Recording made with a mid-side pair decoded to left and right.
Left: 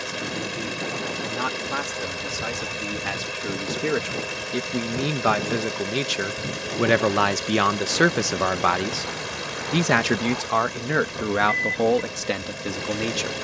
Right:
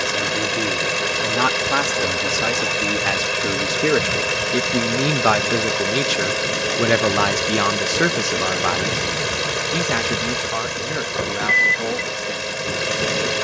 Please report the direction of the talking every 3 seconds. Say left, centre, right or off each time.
right, right, centre, left, left.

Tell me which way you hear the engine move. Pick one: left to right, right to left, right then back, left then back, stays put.
stays put.